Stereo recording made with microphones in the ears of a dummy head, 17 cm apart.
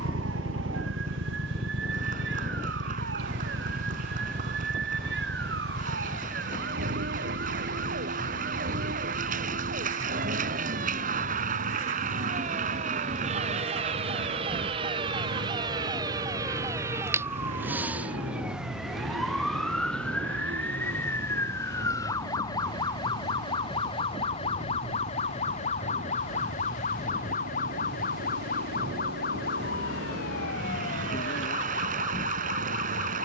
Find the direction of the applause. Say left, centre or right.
right.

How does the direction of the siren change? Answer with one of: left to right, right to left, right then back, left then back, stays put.
right to left.